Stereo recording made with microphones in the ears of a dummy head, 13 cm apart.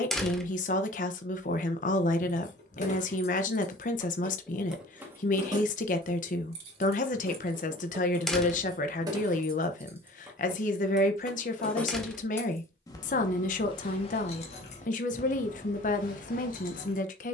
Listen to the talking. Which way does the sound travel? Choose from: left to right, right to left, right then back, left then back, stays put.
stays put.